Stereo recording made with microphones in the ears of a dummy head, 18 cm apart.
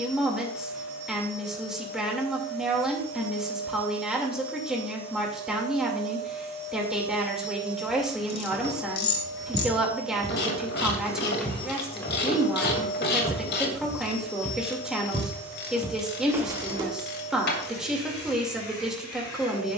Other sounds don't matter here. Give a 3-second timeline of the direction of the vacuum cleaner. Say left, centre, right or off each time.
right, right, right, centre, left, left, left.